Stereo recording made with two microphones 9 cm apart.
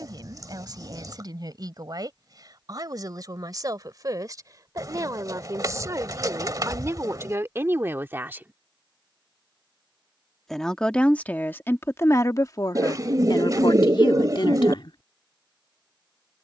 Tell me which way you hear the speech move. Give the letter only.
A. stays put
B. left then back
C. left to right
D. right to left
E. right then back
D.